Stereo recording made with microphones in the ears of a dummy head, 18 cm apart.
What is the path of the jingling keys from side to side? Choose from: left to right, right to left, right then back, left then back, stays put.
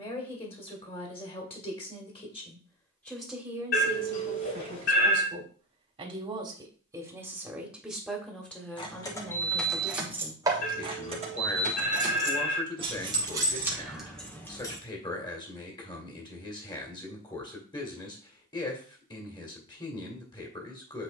right then back.